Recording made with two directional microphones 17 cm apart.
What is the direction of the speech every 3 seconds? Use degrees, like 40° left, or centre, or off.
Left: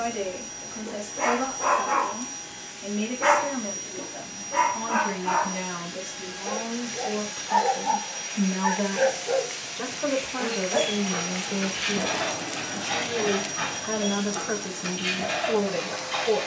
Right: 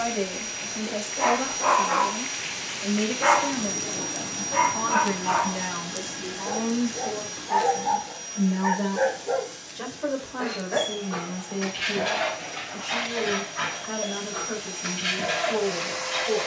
20° right, 10° right, centre, 20° left, 40° left, 40° left.